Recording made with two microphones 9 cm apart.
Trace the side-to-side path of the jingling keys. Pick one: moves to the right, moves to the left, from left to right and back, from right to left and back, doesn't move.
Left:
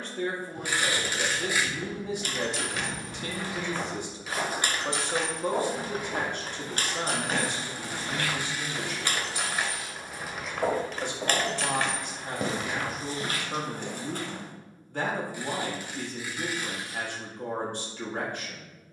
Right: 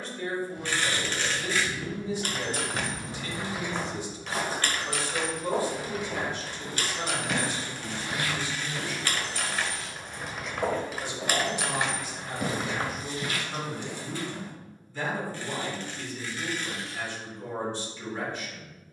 from right to left and back.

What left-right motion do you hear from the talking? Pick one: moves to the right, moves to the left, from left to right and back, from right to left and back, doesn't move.
doesn't move.